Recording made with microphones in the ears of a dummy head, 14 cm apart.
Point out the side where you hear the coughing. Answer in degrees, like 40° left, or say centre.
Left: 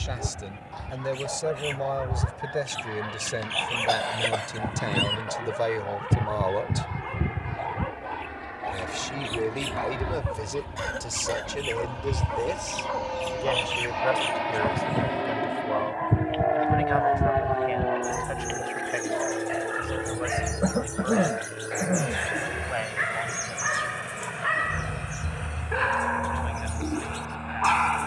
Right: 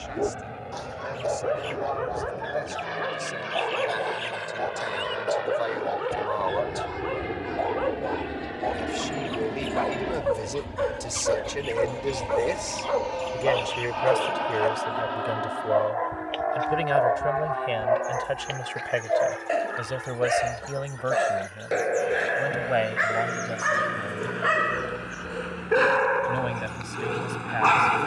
80° left.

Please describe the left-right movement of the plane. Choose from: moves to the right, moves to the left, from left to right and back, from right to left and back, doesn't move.
moves to the left.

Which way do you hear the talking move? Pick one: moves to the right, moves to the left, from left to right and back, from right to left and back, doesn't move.
moves to the right.